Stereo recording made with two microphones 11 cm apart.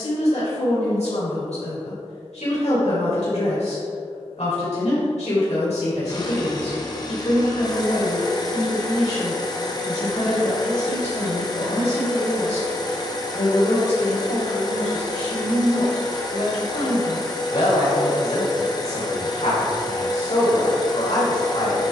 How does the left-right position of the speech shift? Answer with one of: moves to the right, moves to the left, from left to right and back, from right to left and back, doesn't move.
doesn't move.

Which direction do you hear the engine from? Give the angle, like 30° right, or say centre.
40° left.